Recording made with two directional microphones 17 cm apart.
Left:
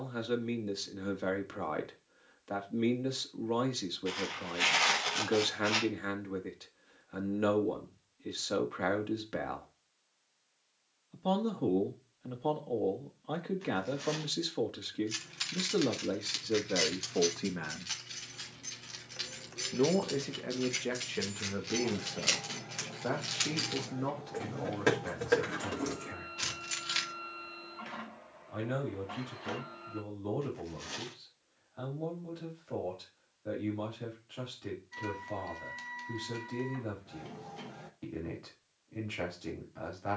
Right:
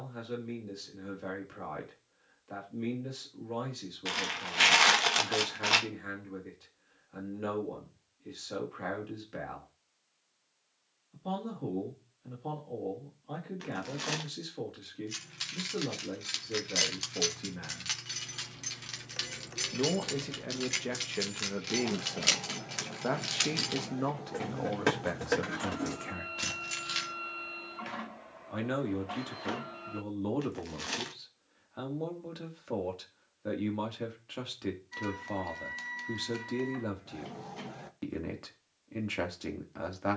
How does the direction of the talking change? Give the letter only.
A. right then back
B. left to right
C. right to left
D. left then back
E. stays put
B.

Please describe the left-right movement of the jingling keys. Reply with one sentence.
You can hear the jingling keys go right and come back.